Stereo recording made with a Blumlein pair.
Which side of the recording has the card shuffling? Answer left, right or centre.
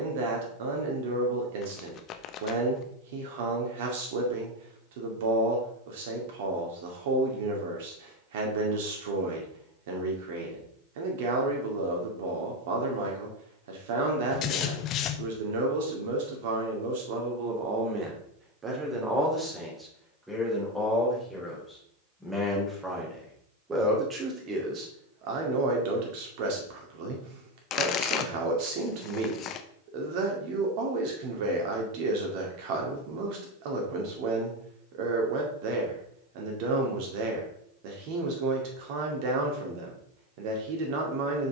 left.